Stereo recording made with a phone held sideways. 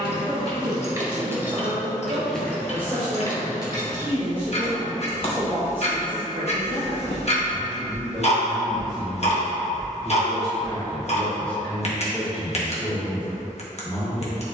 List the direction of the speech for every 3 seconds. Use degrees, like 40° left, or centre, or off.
20° right, 20° right, 10° right, centre, 20° left.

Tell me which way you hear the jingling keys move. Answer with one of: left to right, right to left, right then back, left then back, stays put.
right to left.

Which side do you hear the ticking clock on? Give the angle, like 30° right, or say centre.
50° left.